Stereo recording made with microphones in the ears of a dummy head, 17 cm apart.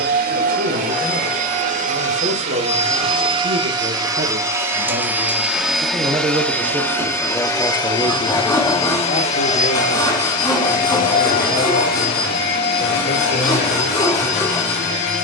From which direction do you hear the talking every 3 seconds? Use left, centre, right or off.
right, right, centre, left, left.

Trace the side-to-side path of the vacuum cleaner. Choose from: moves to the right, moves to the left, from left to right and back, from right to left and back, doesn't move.
moves to the left.